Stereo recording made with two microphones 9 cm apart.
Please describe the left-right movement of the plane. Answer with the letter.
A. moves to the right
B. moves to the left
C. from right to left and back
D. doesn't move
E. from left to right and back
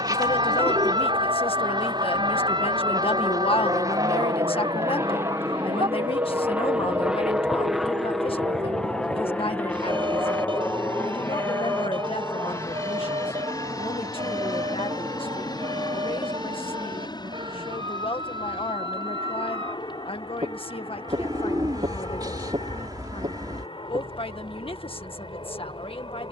B.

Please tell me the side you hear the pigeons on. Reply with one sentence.
You can hear the pigeons on the right.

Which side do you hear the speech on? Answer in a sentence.
You can hear the speech on the left.